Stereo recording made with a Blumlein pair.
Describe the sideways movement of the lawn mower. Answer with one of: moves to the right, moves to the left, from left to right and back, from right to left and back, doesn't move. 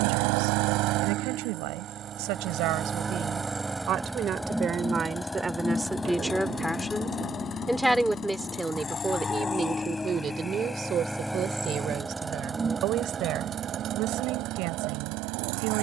from right to left and back.